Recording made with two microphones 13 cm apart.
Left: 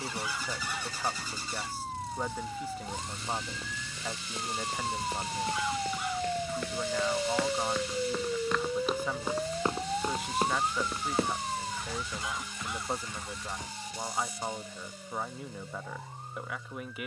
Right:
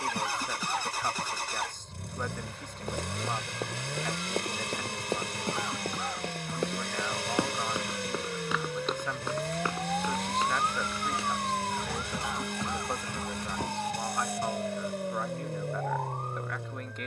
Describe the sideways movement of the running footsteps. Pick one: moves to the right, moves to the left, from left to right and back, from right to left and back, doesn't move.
moves to the left.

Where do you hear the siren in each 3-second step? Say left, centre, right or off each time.
left, left, left, centre, right, right.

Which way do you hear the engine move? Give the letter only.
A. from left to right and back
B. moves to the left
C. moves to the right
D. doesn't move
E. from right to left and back
D.